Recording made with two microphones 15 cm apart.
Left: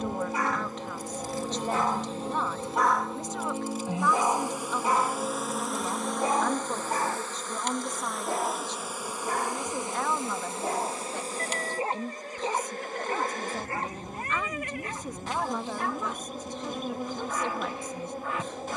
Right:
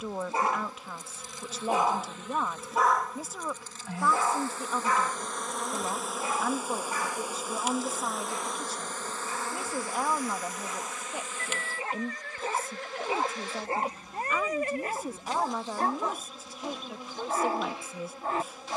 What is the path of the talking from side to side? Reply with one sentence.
In this clip you hear the talking stay in one place.